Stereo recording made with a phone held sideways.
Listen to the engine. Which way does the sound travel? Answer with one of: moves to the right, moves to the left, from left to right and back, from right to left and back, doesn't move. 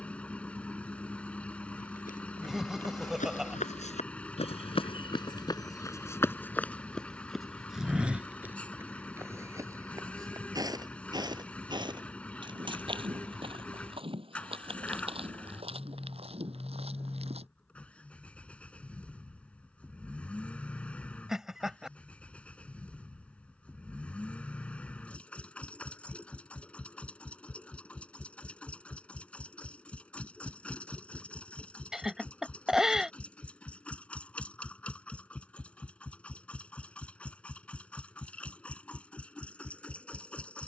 doesn't move.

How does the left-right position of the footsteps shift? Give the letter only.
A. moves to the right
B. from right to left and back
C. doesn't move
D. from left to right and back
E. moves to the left
A.